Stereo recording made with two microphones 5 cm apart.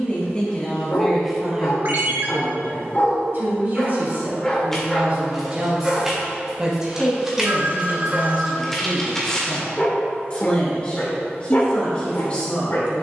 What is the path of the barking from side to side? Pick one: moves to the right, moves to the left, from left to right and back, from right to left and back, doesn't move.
from left to right and back.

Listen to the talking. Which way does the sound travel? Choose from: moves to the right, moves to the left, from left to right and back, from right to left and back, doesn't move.
from left to right and back.